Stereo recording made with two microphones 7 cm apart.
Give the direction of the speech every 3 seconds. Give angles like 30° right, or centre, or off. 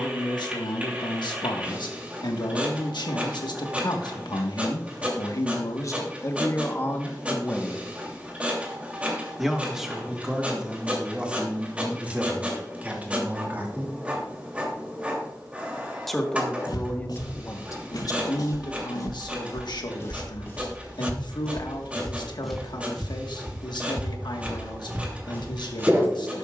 80° left, 60° left, 30° left, 10° right, 20° right, 30° left, 70° left, 80° left, 80° left.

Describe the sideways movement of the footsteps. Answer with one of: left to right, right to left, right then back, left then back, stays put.
left to right.